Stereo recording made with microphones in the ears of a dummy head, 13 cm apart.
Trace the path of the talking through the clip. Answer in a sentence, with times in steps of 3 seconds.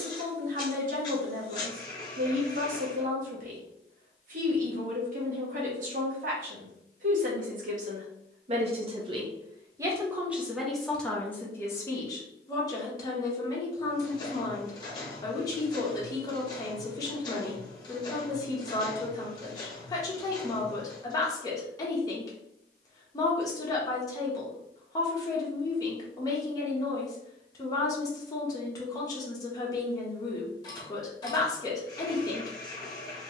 In this clip you hear the talking on the right from 0 s, in the centre from 9 s and on the left from 12 s.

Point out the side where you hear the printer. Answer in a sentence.
You can hear the printer on the left.